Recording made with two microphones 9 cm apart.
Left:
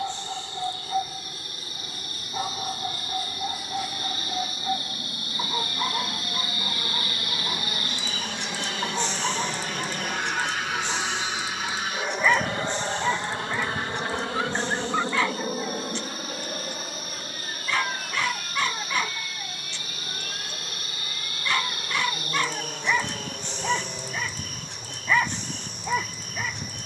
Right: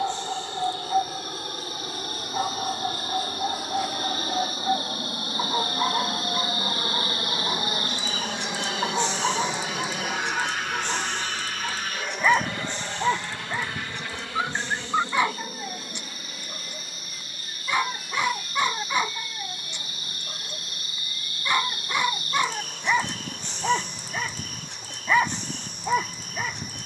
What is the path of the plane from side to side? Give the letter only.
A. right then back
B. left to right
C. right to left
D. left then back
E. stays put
C.